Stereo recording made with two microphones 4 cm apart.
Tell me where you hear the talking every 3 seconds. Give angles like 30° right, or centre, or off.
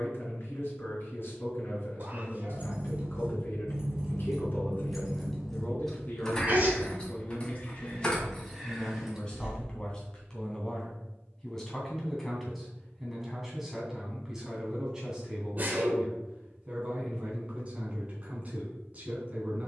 50° left, 50° left, 30° left, 20° left, 10° right, 20° right, 30° right.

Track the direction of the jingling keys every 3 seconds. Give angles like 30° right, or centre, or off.
30° right, 10° right, 20° left, 20° right, off, off, off.